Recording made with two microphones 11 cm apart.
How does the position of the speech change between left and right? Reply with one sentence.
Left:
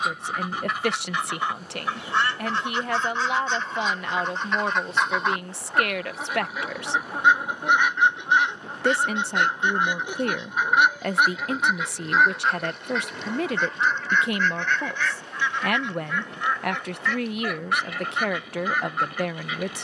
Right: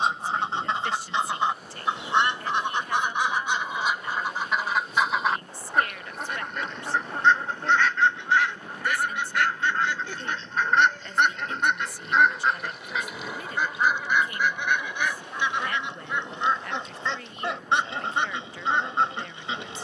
You can hear the speech stay put.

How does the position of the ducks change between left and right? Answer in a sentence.
You can hear the ducks go left and come back.